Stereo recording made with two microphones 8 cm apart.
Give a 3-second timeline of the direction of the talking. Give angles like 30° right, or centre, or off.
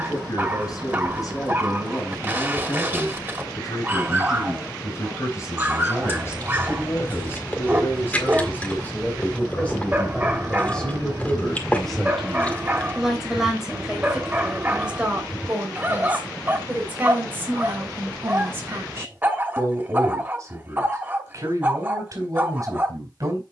50° left, 40° left, 30° left, 10° left, 10° right, 20° right, 30° right, 40° right.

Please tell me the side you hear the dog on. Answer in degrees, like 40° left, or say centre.
20° right.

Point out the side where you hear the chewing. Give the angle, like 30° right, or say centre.
20° left.